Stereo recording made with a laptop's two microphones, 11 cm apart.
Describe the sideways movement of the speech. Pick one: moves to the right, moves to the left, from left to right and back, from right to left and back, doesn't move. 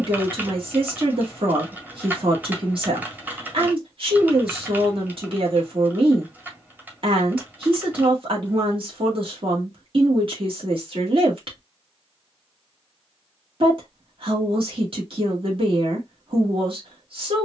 doesn't move.